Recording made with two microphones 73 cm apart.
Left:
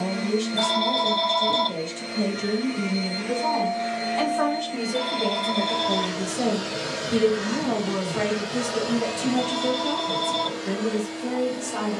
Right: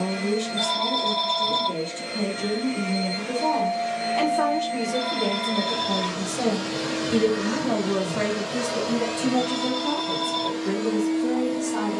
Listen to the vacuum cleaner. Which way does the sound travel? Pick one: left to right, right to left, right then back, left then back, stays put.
right to left.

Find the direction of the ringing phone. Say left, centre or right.
left.